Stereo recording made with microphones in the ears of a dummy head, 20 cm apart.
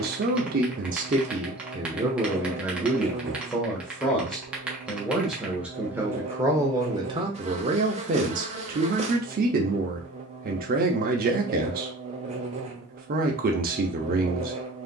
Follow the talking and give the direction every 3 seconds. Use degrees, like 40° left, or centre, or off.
30° right, centre, 20° right, 40° right, 40° right.